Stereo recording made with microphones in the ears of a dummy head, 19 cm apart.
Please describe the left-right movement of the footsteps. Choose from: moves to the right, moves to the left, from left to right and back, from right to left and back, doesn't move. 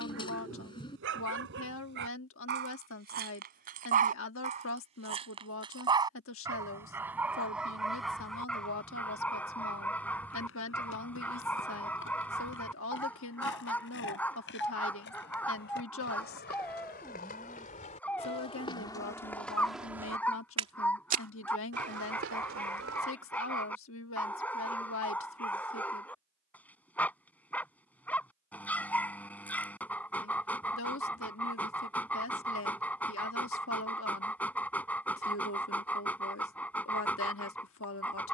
moves to the right.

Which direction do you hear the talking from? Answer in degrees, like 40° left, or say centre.
70° left.